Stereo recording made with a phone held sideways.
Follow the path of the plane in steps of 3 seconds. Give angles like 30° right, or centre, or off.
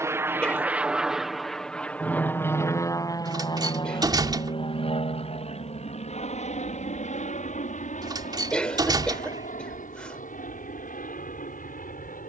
centre, 40° left, 60° left, 60° left.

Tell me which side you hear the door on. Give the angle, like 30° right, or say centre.
30° right.